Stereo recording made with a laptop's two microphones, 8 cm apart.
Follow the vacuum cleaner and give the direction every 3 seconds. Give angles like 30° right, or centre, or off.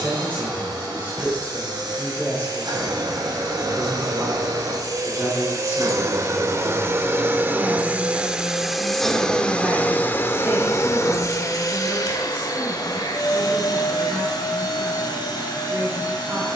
70° right, 60° right, 30° right, 30° left, 60° left, 70° left.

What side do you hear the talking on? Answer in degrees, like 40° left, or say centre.
30° right.